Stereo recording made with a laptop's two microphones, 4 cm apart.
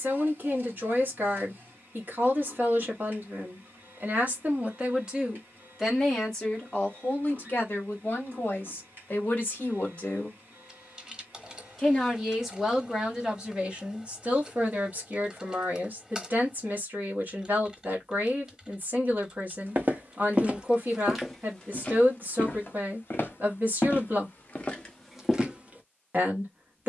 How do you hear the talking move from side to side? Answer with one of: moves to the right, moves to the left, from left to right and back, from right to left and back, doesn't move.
from right to left and back.